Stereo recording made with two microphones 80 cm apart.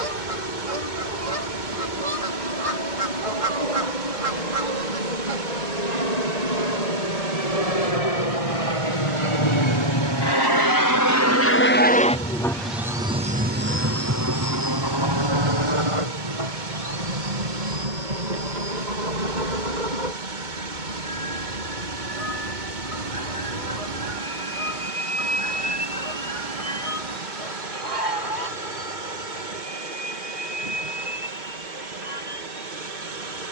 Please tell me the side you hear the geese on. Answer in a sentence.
In this clip you hear the geese on the right.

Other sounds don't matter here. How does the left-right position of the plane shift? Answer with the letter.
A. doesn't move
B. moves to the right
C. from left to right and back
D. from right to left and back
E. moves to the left
B.